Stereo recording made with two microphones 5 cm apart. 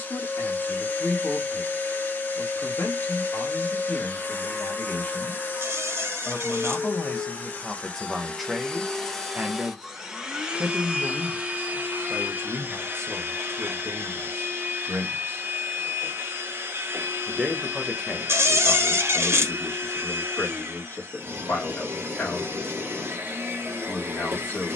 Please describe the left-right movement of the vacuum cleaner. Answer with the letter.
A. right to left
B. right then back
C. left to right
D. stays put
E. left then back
C.